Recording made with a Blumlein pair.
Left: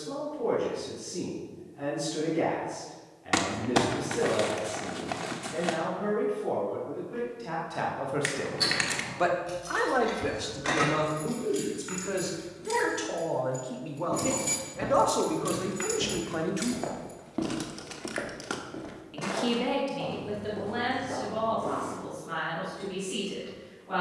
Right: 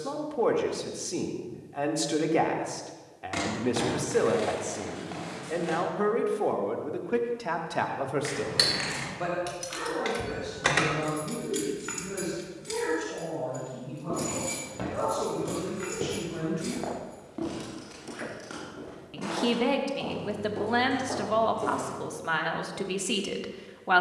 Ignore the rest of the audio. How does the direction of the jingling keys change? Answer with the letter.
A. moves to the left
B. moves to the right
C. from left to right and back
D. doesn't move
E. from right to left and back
A.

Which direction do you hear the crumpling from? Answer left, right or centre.
left.